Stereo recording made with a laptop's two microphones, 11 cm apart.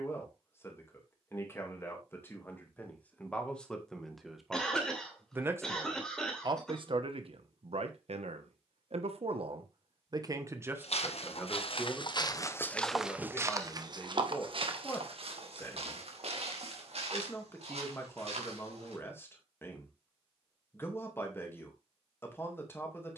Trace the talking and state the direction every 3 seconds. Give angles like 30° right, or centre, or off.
20° left, 10° right, 60° right, 30° right, 20° left, 20° left, 20° left, 20° left.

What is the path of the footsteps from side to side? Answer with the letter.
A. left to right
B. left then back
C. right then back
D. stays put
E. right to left
A.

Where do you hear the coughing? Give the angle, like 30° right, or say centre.
centre.